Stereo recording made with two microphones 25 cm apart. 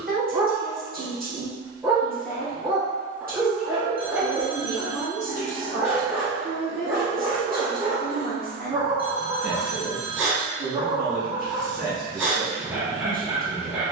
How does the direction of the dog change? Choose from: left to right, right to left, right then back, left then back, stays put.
stays put.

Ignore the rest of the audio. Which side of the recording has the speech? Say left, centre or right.
right.